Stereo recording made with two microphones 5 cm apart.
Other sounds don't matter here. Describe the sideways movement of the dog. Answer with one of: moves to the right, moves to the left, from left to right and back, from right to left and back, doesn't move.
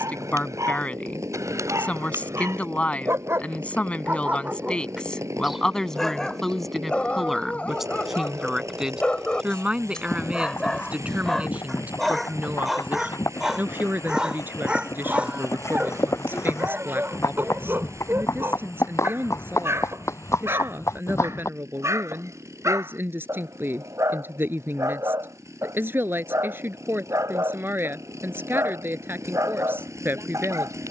from right to left and back.